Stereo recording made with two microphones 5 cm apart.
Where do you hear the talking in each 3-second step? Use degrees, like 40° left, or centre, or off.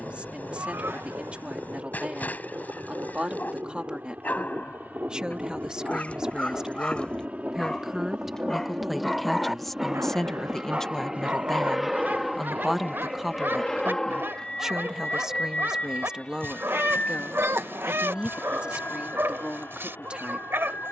30° right, 20° right, 10° right, centre, 10° right, 20° right, 30° right.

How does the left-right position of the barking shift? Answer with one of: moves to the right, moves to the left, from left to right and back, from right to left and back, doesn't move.
moves to the right.